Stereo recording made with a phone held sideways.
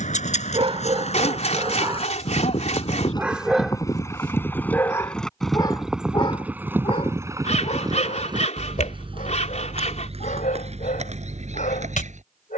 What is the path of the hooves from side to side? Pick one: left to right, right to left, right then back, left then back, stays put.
left to right.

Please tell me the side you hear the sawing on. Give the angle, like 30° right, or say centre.
50° left.